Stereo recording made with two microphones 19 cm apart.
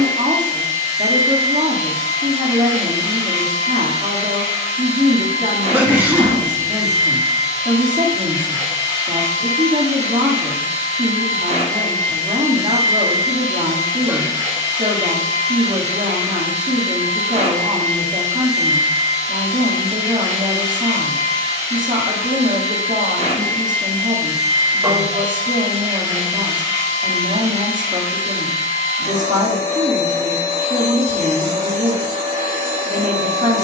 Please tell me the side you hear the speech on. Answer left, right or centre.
right.